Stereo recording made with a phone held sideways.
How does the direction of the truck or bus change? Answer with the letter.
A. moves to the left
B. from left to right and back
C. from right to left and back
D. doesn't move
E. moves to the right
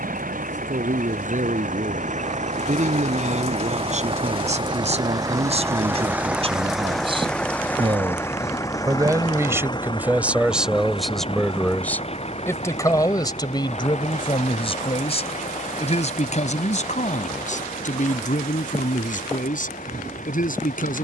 A.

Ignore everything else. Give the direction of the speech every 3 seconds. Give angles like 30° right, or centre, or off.
60° right, 50° right, 40° right, 10° right, 30° left, 50° left, 70° left.